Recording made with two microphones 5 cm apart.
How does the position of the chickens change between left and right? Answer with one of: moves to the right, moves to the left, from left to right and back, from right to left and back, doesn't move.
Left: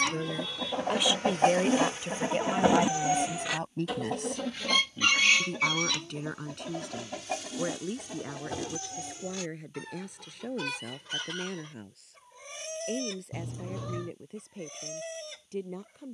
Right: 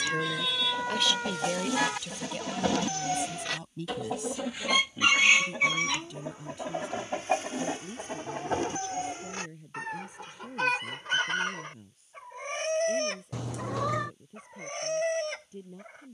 moves to the right.